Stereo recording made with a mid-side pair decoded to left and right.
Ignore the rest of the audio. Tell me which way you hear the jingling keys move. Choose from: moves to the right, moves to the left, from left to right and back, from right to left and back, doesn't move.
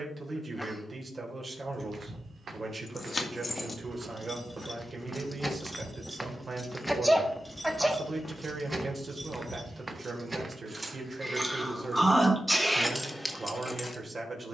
from left to right and back.